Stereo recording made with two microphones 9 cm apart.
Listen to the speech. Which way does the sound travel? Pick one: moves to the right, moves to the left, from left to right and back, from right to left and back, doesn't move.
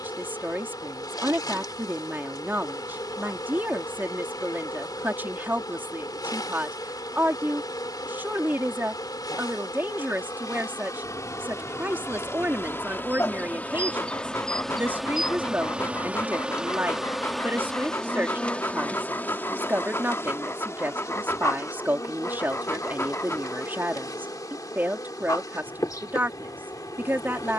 doesn't move.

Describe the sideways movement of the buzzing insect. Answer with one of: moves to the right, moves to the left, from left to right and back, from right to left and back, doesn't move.
from left to right and back.